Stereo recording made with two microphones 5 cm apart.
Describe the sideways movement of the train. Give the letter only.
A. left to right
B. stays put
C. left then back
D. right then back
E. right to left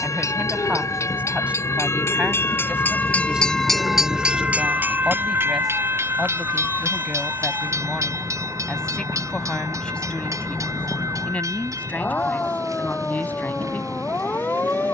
A.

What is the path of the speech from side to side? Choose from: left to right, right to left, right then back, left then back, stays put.
right to left.